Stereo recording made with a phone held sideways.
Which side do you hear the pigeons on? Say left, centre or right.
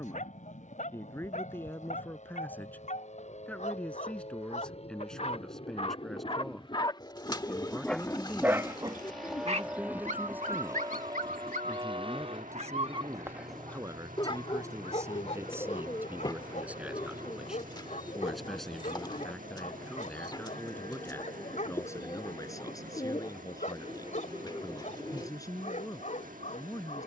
left.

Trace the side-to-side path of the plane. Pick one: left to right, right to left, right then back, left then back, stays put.
left to right.